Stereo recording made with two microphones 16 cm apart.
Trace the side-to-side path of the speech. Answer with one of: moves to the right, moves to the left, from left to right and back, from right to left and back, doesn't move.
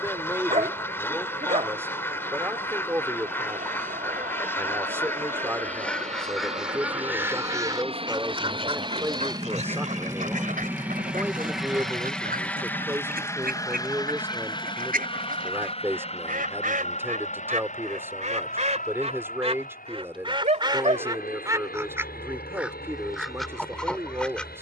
doesn't move.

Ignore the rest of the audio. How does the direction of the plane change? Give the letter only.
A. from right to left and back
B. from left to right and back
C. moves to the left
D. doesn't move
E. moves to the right
C.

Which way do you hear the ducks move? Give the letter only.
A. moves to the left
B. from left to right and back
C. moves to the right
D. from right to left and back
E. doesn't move
B.